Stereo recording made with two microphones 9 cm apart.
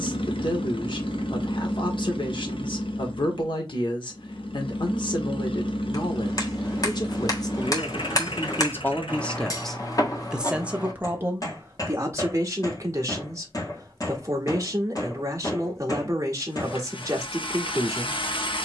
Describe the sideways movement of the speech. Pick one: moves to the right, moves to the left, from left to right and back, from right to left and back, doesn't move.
moves to the right.